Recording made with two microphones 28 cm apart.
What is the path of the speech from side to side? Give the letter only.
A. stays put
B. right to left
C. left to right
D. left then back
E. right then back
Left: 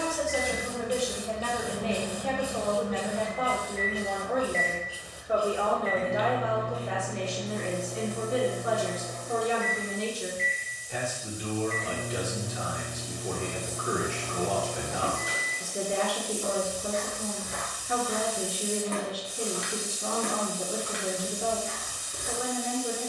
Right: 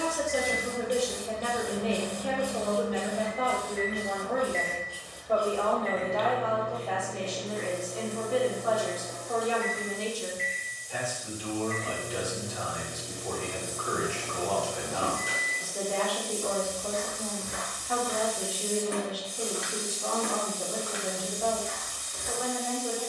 B.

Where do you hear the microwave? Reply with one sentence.
In this clip you hear the microwave in the centre.